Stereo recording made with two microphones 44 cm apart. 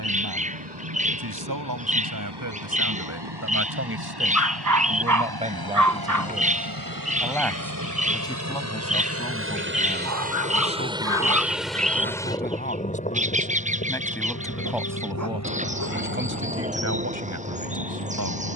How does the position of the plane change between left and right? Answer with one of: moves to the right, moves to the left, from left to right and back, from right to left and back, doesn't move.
moves to the left.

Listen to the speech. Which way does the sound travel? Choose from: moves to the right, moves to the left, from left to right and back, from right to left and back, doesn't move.
from right to left and back.